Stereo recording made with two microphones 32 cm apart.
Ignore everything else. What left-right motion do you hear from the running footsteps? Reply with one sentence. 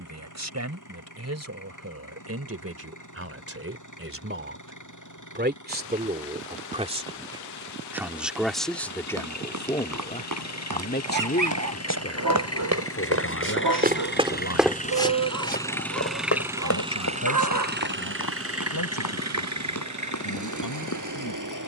You can hear the running footsteps travel towards the left.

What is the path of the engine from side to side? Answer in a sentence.
In this clip you hear the engine move from left to right.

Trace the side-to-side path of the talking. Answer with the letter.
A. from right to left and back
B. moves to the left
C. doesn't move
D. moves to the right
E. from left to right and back
B.